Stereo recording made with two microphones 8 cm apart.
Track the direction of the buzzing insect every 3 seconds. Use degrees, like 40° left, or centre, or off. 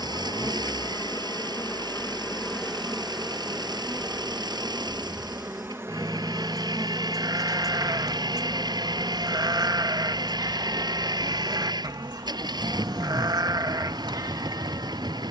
20° left, 20° right, 40° right, 60° right, 70° right.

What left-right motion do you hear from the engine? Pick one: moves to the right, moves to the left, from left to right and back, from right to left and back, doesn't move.
doesn't move.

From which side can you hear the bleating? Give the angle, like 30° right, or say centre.
50° right.